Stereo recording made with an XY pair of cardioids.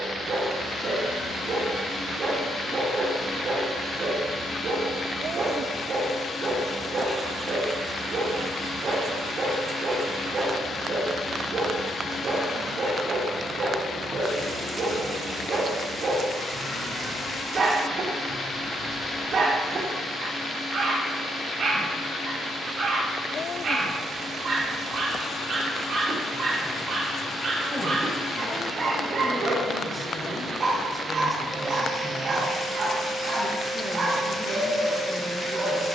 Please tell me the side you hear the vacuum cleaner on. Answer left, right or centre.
left.